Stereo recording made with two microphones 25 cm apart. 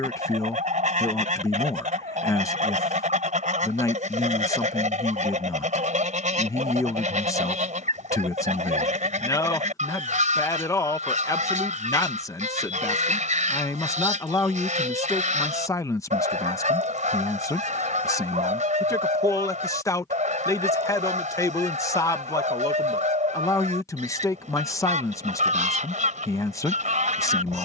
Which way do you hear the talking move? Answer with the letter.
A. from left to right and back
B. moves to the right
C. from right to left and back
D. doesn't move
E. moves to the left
D.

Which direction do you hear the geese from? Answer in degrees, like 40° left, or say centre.
30° right.